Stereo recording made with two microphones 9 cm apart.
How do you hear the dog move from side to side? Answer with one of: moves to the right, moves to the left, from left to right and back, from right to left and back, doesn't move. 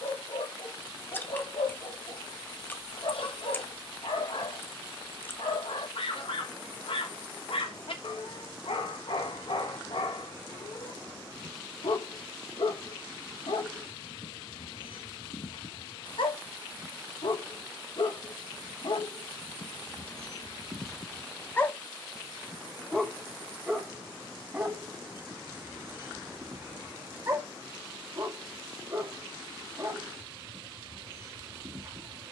moves to the right.